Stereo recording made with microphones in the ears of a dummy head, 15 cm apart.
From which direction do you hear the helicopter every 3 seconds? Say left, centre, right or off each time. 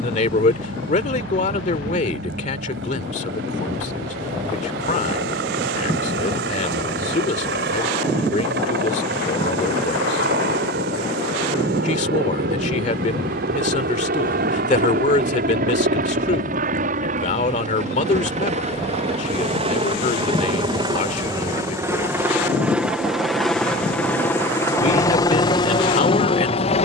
right, right, right, right, right, right, right, centre, left.